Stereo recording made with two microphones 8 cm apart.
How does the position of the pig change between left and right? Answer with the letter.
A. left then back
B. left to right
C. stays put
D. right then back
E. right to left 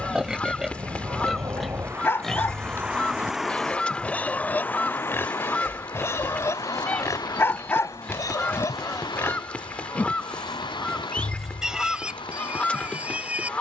A.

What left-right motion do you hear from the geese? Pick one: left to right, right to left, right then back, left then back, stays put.
stays put.